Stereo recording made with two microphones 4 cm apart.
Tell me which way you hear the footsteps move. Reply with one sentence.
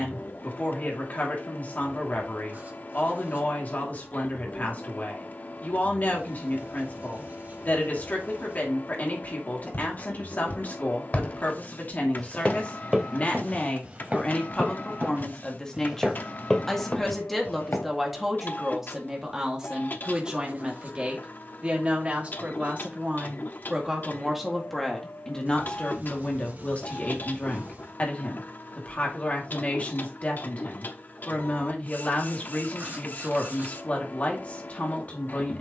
You can hear the footsteps move from left to right and back again.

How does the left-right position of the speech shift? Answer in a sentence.
You can hear the speech go right and come back.